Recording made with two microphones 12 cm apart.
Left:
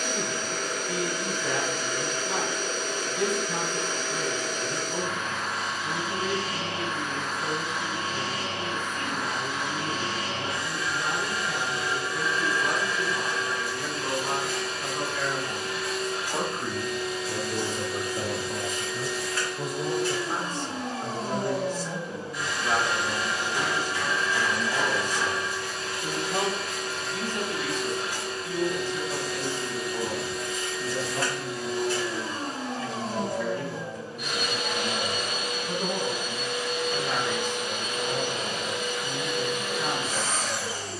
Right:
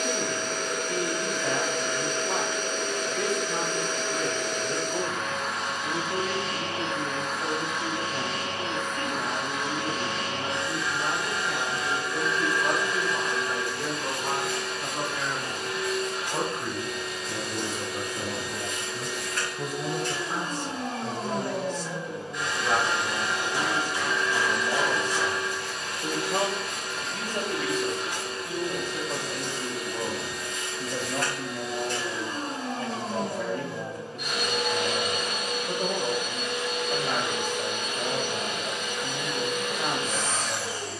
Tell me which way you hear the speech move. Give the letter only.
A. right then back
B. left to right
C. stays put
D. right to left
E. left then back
E.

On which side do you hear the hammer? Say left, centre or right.
right.